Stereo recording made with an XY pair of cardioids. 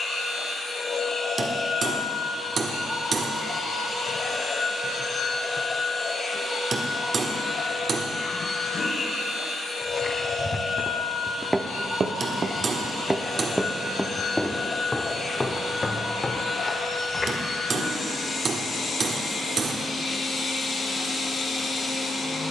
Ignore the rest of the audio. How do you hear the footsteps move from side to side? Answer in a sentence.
In this clip you hear the footsteps go right and come back.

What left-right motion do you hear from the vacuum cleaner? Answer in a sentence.
In this clip you hear the vacuum cleaner stay put.